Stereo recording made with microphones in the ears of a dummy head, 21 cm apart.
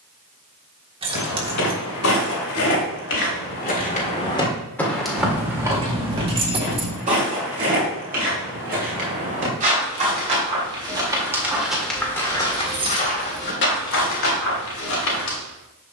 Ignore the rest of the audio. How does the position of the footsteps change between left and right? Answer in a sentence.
In this clip you hear the footsteps go right and come back.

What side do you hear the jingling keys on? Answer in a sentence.
In this clip you hear the jingling keys on the right.